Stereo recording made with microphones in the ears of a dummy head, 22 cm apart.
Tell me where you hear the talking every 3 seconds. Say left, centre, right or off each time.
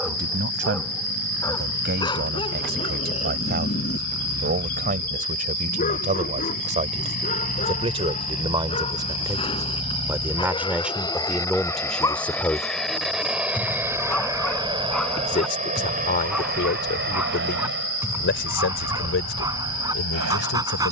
right, right, right, centre, centre, left, left.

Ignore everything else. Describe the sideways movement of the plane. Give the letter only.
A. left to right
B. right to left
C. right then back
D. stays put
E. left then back
A.